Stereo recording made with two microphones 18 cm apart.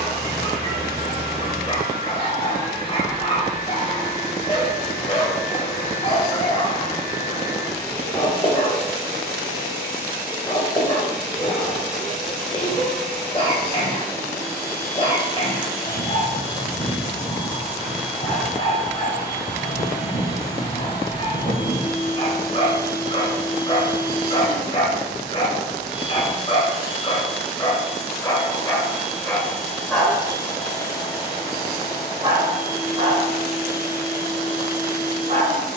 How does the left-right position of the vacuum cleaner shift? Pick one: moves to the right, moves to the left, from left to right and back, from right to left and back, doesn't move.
moves to the left.